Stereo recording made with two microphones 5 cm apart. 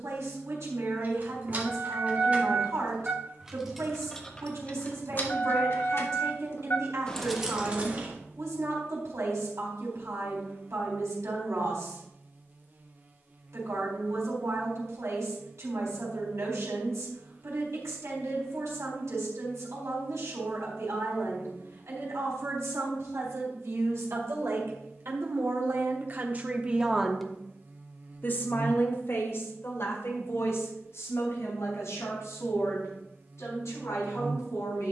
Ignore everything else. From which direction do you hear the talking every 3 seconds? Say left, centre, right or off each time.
right, right, right, right, right, right, right, right, right, left, left, left.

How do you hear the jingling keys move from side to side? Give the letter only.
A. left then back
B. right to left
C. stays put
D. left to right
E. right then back
A.